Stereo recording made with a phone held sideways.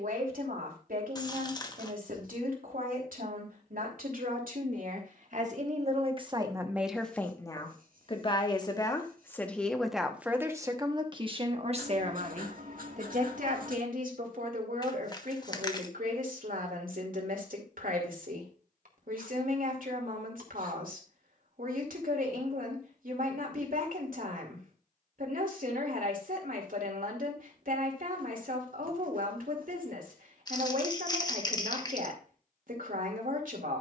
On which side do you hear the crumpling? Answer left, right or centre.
left.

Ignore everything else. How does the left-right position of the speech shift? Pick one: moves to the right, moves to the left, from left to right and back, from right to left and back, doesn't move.
from right to left and back.